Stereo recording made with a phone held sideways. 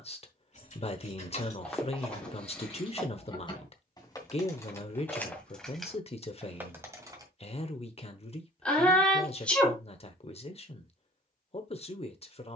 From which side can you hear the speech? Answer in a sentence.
You can hear the speech on the left.